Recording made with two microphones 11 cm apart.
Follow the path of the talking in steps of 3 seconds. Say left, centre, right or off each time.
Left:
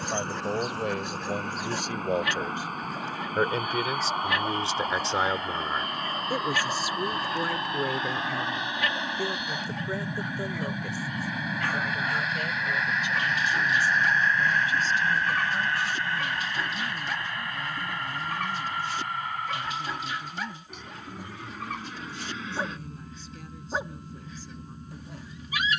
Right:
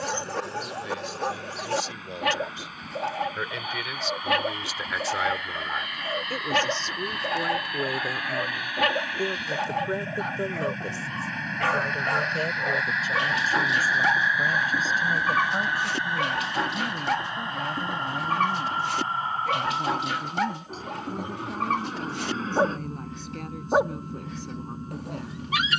left, left, centre, right, right, right, right, right, right.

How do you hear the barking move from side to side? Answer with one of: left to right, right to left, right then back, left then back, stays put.
stays put.